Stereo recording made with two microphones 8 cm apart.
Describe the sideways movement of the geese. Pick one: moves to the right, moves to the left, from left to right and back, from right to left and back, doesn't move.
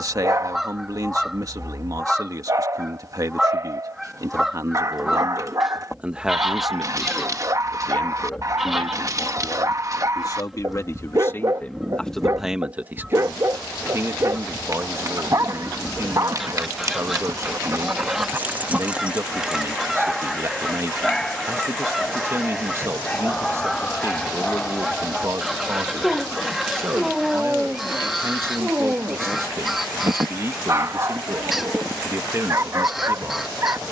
doesn't move.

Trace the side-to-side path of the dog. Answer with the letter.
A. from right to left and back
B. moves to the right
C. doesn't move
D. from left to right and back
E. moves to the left
A.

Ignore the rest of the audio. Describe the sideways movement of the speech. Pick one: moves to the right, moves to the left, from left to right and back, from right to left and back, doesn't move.
from right to left and back.